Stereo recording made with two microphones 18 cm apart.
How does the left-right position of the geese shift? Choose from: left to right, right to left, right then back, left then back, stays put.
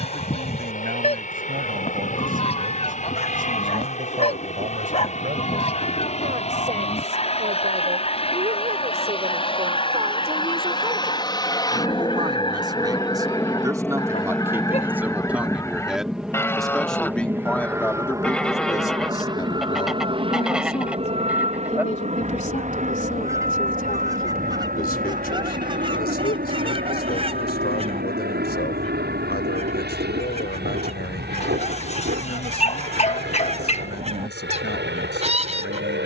left to right.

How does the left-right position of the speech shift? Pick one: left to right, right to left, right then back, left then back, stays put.
right to left.